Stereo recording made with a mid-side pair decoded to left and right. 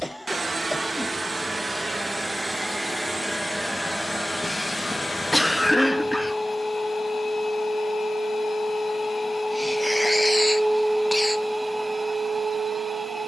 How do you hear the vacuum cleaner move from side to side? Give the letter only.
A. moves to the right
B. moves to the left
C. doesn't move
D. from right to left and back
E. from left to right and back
D.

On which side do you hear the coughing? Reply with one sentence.
You can hear the coughing in the centre.